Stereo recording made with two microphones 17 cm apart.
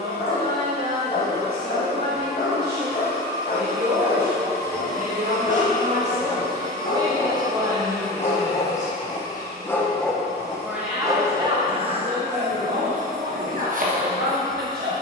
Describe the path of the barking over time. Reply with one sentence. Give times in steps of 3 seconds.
You can hear the barking on the left from 0 s, in the centre from 9 s and on the right from 12 s.